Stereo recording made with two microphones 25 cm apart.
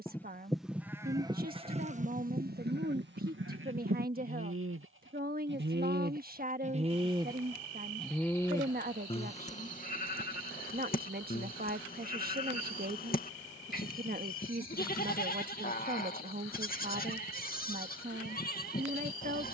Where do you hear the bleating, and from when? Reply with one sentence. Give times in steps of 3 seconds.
In this clip you hear the bleating on the right from 0 s, in the centre from 6 s and on the left from 9 s.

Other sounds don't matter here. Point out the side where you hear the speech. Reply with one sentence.
You can hear the speech on the right.